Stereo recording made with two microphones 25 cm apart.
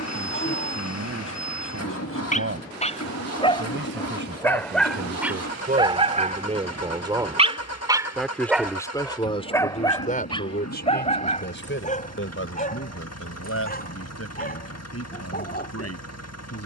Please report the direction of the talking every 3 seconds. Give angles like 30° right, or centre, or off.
60° right, 40° right, 10° right, 40° left, 60° left, 70° left.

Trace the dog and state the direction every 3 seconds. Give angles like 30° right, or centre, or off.
30° left, centre, 20° right, 20° left, 30° left, 40° left.